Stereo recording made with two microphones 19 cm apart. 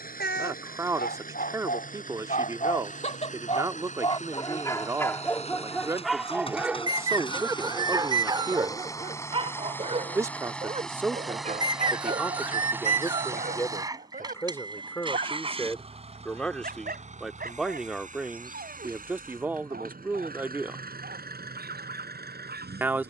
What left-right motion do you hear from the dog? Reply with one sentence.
You can hear the dog move from left to right.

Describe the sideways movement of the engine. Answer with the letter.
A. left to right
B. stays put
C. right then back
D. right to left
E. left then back
A.